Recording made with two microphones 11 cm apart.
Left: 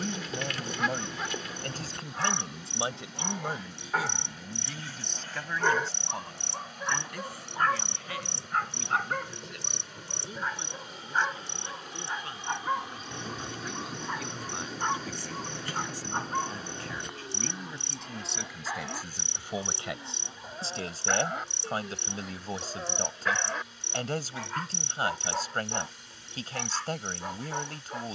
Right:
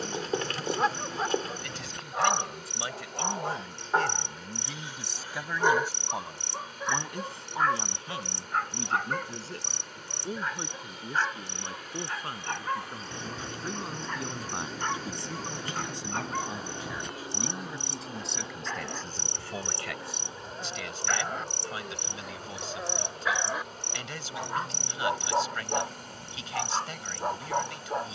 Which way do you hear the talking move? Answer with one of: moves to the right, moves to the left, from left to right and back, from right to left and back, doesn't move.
from left to right and back.